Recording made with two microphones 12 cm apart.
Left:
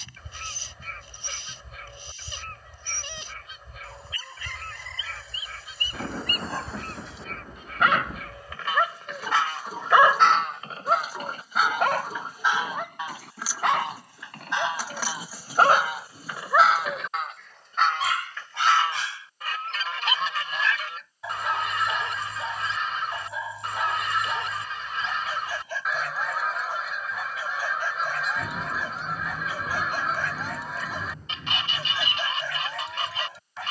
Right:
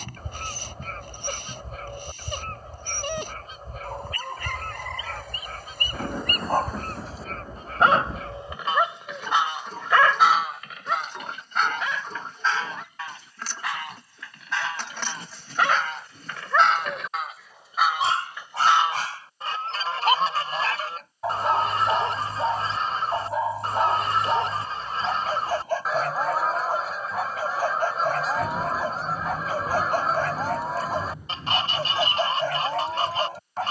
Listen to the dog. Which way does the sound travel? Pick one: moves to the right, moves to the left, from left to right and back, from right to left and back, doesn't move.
from right to left and back.